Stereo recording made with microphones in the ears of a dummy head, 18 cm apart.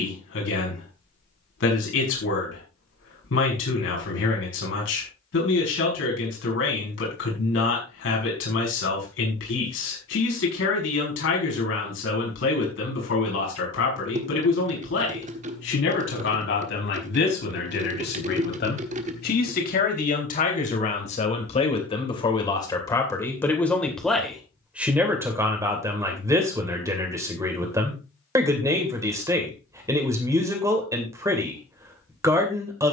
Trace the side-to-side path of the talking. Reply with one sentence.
You can hear the talking travel towards the right.